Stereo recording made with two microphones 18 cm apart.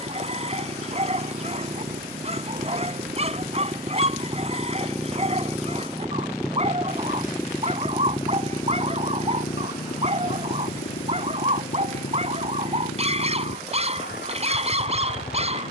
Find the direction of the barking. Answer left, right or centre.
right.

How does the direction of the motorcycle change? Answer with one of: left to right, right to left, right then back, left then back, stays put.
right to left.